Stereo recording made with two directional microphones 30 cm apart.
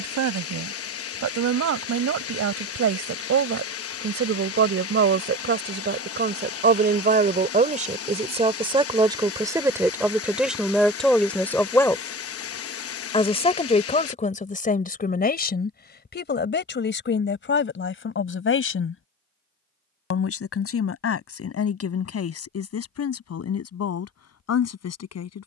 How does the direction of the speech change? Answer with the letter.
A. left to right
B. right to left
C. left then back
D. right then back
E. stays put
B.